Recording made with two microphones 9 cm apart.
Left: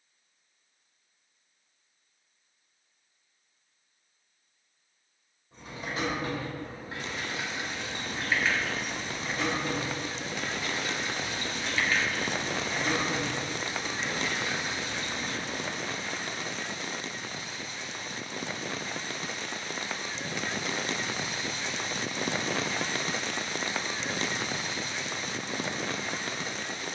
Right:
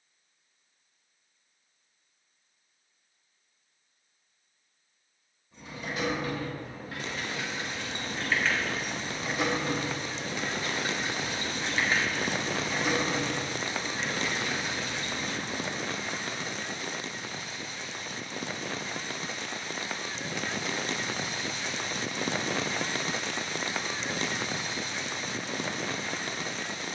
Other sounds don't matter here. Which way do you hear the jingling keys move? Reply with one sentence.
In this clip you hear the jingling keys move from left to right and back again.